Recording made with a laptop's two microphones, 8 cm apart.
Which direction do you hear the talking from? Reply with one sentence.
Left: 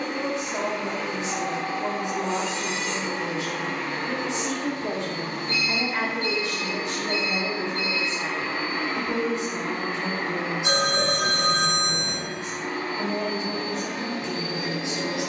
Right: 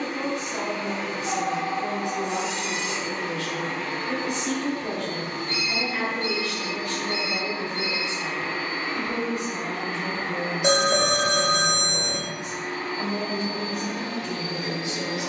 You can hear the talking on the left.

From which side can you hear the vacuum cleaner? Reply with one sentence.
You can hear the vacuum cleaner on the left.